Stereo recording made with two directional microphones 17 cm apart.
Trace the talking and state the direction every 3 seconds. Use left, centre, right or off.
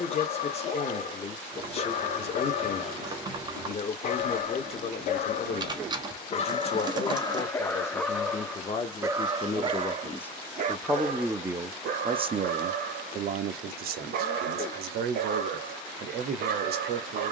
left, left, left, centre, right, right.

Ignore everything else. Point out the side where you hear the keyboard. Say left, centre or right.
right.